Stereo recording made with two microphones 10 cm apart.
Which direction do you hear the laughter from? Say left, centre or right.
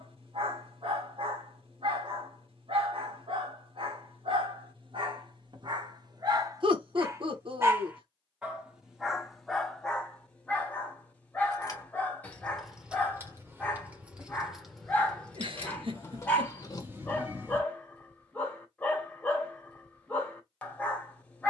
right.